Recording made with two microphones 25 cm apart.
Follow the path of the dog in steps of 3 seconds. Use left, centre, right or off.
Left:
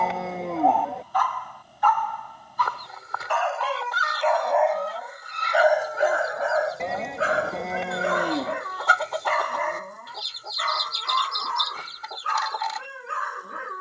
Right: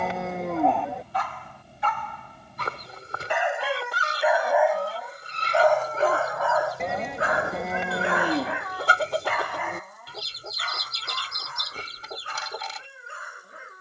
right, centre, left, left, left.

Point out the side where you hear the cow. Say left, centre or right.
centre.